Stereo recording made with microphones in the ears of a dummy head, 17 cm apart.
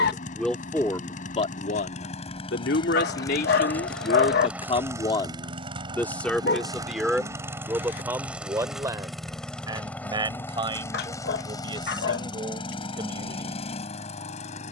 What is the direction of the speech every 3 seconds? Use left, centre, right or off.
left, left, centre, right, right.